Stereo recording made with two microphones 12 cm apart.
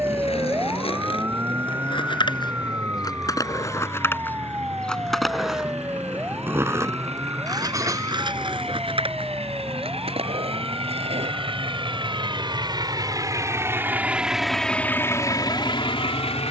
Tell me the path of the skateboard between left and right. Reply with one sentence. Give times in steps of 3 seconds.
You can hear the skateboard on the left from 0 s, in the centre from 3 s, on the right from 6 s and not at all from 12 s.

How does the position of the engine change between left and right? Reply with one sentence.
In this clip you hear the engine go from the right side to the left.